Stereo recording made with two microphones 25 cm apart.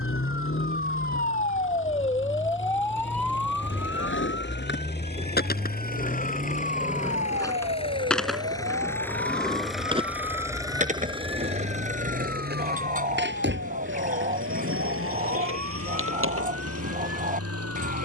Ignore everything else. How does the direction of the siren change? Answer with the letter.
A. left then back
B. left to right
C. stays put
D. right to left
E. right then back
B.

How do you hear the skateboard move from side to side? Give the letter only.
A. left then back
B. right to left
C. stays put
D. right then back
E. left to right
E.